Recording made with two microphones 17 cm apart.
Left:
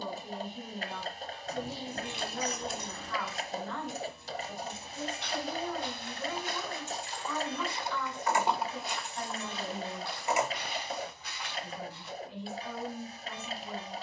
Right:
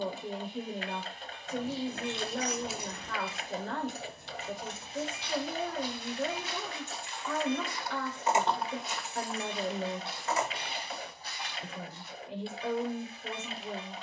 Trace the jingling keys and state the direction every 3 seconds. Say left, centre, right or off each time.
centre, right, right, centre, off.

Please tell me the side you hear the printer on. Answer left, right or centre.
left.